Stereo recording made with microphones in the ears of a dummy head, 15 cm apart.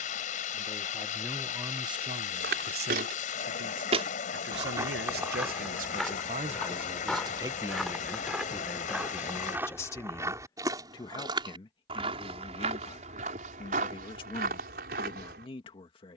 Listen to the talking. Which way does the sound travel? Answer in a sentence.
You can hear the talking move from left to right and back again.